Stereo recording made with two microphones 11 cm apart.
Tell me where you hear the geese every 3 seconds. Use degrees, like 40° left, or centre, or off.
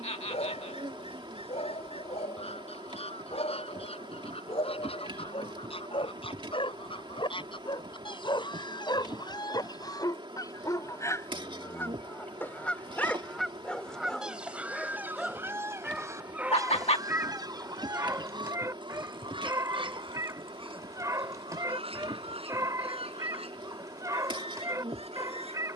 70° left, 60° left, 50° left, 30° left, centre, 30° right, 50° right, 60° right, 70° right.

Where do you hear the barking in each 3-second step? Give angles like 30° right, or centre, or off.
70° left, 60° left, 50° left, 30° left, 10° left, 10° right, 30° right, 30° right, 30° right.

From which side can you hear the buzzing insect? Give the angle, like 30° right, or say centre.
50° right.